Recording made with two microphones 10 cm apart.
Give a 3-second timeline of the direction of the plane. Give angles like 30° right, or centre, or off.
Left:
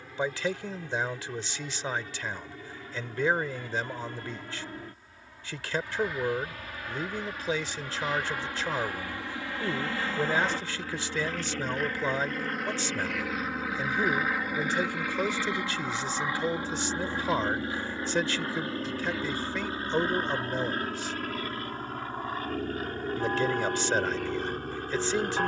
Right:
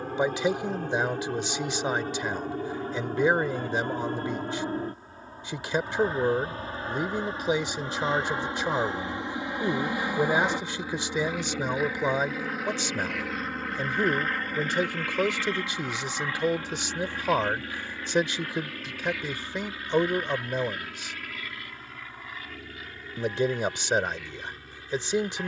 50° right, 40° right, 30° right, 10° right, centre, 20° left, 30° left, 40° left, 50° left.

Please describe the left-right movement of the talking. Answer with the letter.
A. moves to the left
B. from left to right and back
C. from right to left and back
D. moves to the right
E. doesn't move
E.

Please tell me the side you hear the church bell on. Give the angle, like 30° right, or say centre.
50° left.